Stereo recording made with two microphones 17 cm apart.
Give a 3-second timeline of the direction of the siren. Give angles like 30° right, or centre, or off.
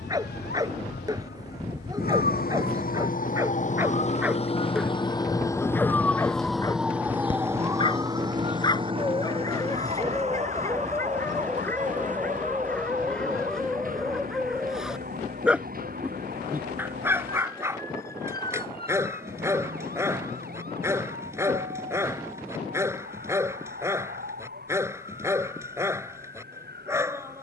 70° left, 30° left, 10° right, 40° right, 50° right, 60° right, 60° right, 60° right, 60° right.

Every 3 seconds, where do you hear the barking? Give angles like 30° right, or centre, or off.
20° right, 10° right, 20° left, 20° left, centre, 10° right, 20° right, 20° right, 20° right.